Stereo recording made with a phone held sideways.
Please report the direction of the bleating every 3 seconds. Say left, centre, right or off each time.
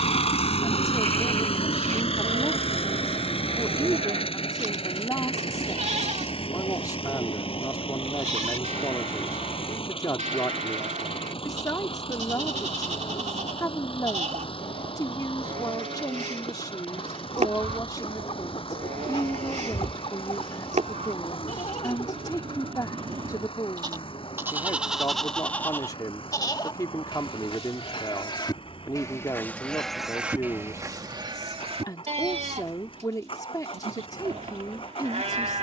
right, right, right, right, right, right, right, right, centre, left, right, right.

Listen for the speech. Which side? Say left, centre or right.
left.